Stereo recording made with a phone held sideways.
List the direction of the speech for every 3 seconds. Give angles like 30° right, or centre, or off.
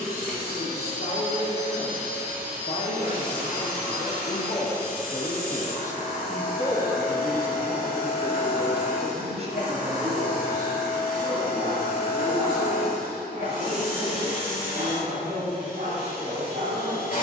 70° left, 40° left, 10° right, 50° right, 60° right, 70° right.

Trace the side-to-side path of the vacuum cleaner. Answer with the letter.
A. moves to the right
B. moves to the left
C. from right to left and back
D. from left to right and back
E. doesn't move
E.